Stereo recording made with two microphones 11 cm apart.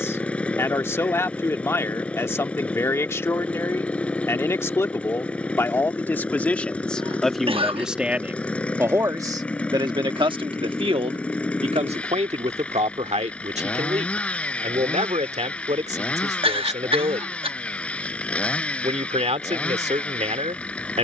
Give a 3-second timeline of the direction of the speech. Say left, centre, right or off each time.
left, left, centre, right, right, right, right.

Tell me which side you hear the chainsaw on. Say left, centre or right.
centre.